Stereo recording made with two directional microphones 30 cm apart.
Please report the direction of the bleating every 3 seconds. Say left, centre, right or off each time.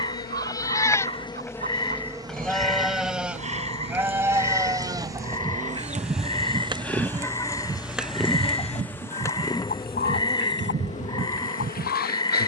centre, centre, right, right.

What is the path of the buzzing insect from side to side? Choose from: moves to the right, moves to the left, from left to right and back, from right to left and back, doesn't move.
from left to right and back.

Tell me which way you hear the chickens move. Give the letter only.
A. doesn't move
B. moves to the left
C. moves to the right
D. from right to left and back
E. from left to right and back
B.